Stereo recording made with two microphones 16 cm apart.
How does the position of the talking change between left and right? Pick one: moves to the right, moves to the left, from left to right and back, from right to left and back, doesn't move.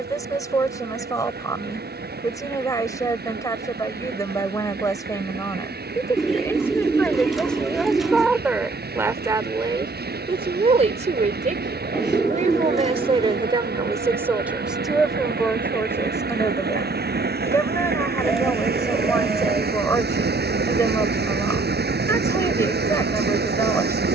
from left to right and back.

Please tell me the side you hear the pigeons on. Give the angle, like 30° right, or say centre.
centre.